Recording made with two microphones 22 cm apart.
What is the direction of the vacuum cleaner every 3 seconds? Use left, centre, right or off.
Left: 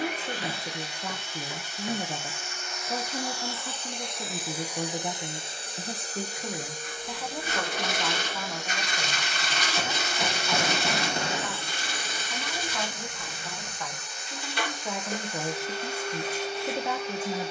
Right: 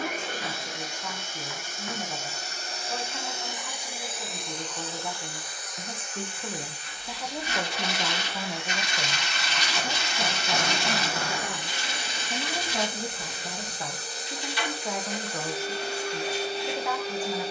right, centre, left, centre, right, right.